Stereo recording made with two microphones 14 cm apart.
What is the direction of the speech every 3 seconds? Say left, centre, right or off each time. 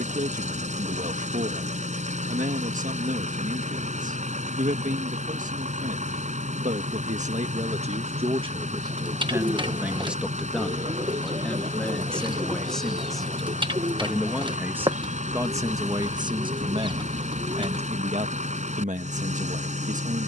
right, right, right, centre, centre, right, right.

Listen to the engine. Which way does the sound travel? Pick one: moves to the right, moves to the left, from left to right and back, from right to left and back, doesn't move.
doesn't move.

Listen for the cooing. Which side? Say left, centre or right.
right.